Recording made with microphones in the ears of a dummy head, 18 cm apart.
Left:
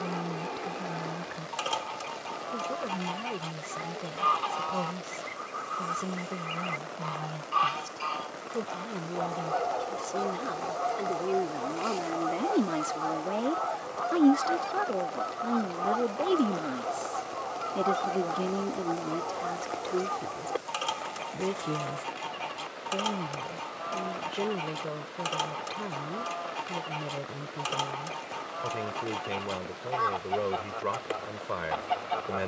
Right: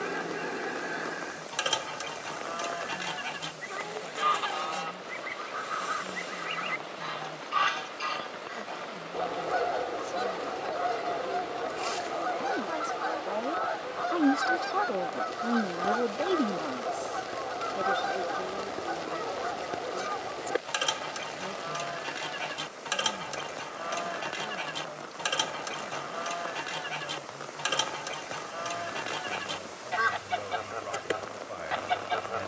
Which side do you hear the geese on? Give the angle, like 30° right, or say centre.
20° right.